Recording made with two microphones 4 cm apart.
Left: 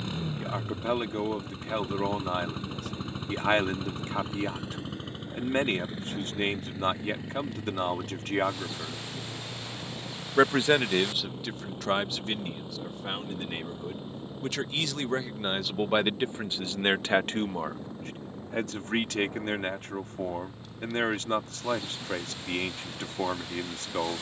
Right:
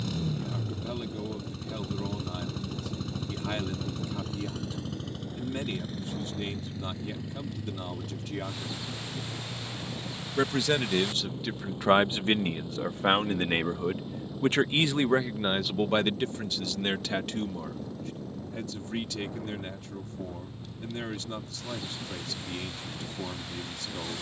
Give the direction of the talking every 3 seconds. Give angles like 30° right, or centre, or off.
60° left, 60° left, 60° left, 10° left, 50° right, 20° left, 60° left, 60° left.